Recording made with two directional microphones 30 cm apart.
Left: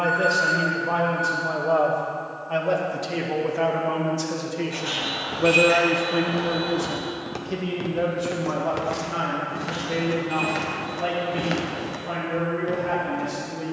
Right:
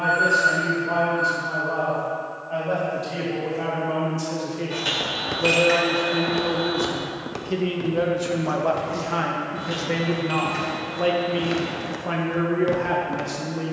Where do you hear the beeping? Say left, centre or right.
right.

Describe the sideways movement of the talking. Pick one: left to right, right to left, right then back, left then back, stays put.
left to right.